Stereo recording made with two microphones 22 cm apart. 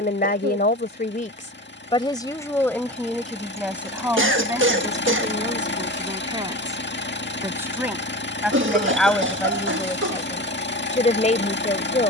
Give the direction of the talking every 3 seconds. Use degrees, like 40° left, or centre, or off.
30° left, 10° right, 10° right, 20° left.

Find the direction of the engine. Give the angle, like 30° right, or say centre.
60° left.